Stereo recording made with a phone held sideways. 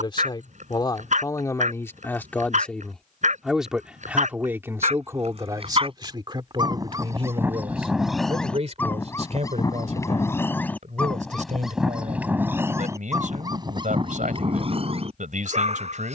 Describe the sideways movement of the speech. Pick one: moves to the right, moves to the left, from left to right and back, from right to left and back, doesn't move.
moves to the right.